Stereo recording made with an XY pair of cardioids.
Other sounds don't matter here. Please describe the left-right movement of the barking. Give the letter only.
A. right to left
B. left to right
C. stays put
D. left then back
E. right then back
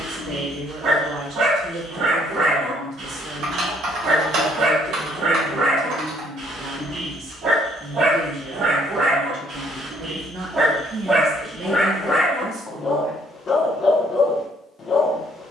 A.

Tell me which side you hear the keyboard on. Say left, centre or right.
right.